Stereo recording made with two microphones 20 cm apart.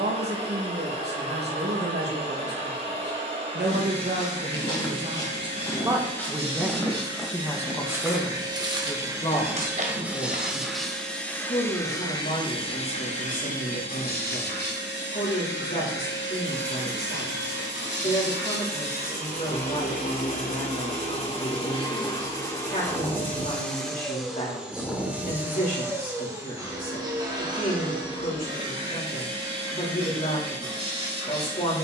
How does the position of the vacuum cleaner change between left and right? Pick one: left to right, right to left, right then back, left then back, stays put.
left then back.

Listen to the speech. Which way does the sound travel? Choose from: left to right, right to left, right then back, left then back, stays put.
right to left.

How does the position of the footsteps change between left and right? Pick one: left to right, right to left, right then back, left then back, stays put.
left to right.